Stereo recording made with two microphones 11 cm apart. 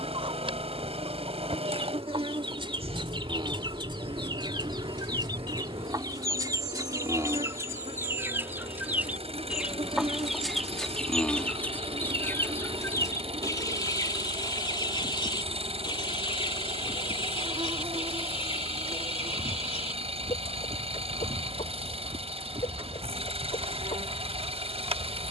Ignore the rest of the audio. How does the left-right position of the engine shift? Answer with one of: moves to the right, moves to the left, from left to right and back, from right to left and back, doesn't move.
doesn't move.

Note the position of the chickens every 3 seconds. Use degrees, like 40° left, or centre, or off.
50° right, 40° right, 30° right, centre, 30° left, 50° left, 60° left, 70° left, 70° left.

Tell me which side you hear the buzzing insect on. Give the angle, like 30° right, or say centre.
60° right.